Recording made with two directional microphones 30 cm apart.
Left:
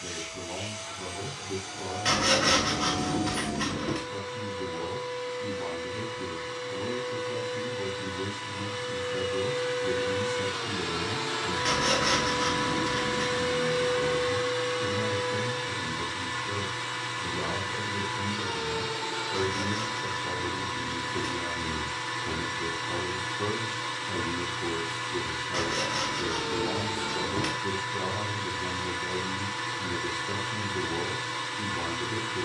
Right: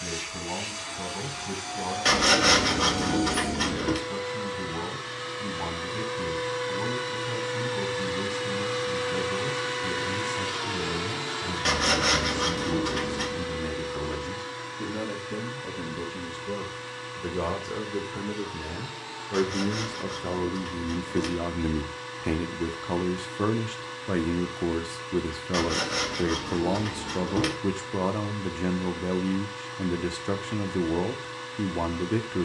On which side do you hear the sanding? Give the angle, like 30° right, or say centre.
40° right.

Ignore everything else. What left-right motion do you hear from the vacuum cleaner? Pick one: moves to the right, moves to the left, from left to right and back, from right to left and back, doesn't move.
moves to the left.